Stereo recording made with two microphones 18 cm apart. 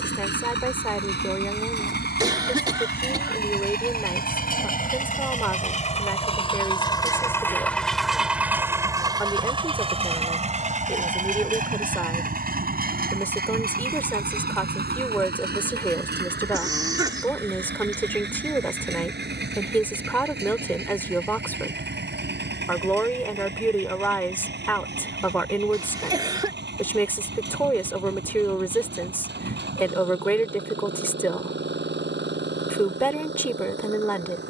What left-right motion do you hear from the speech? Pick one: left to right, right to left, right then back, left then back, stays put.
stays put.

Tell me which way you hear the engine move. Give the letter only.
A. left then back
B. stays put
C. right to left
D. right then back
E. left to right
E.